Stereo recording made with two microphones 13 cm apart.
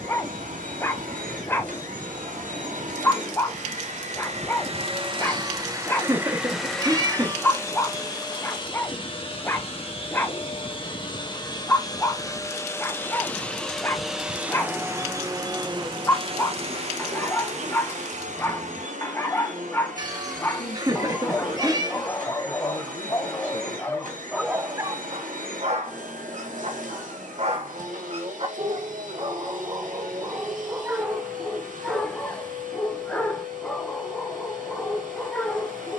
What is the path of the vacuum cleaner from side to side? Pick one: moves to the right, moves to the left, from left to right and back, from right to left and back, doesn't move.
from right to left and back.